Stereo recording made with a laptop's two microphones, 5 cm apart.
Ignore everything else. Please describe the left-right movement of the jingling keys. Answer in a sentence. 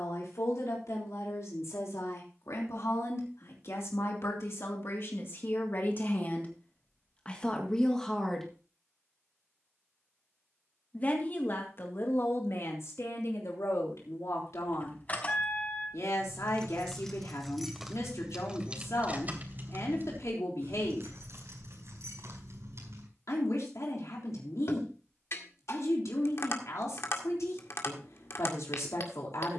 In this clip you hear the jingling keys travel towards the right.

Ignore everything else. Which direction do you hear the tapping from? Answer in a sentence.
You can hear the tapping on the left.